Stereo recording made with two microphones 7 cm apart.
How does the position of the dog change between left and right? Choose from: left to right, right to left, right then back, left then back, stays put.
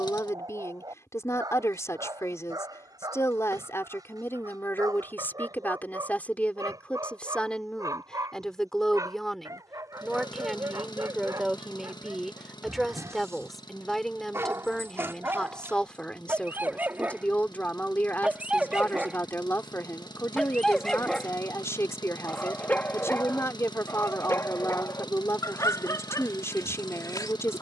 right to left.